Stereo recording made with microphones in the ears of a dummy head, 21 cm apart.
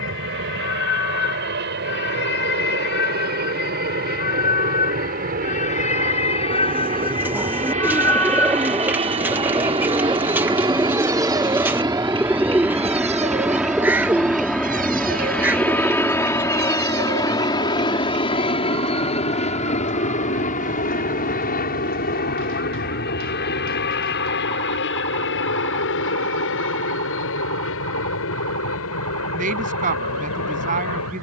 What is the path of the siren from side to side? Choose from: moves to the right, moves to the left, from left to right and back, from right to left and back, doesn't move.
moves to the right.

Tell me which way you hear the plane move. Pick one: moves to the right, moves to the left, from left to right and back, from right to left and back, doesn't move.
moves to the left.